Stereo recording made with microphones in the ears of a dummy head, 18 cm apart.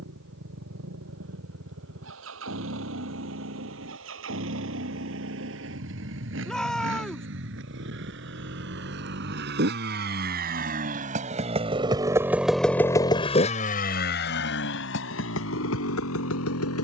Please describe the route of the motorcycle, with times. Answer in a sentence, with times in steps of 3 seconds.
In this clip you hear the motorcycle on the right from 0 s and on the left from 12 s.